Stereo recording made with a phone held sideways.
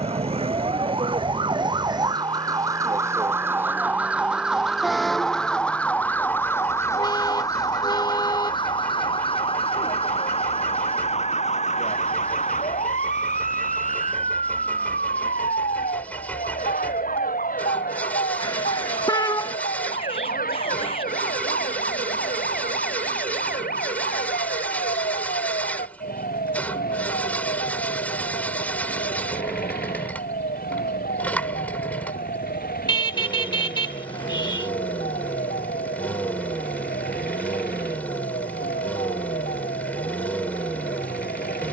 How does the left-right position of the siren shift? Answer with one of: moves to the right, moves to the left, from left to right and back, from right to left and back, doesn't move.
moves to the left.